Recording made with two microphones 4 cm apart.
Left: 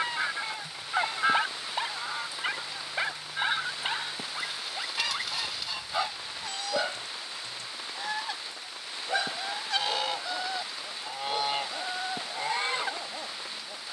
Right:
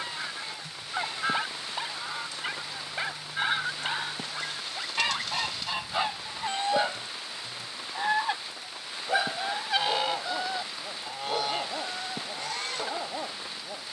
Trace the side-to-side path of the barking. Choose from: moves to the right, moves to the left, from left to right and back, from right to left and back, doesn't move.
moves to the right.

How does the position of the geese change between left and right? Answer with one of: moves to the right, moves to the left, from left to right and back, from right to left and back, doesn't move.
from left to right and back.